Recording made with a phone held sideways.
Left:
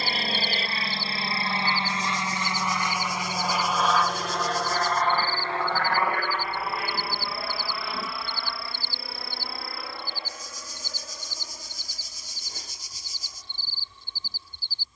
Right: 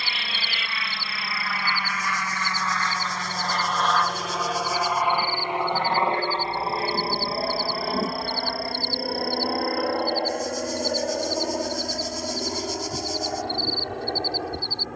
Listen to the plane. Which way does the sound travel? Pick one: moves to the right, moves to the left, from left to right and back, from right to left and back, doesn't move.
moves to the right.